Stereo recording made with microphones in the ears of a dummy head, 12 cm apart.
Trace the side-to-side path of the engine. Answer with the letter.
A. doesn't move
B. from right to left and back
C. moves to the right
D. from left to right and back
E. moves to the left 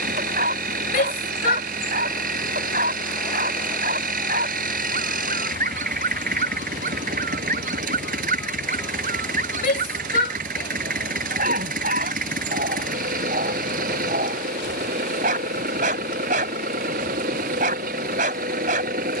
A.